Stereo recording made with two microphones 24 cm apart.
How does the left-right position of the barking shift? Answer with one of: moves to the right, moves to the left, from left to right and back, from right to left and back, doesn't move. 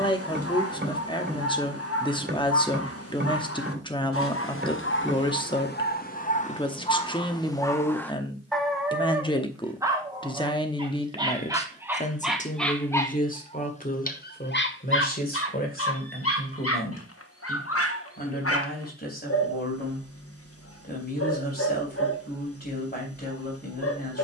from left to right and back.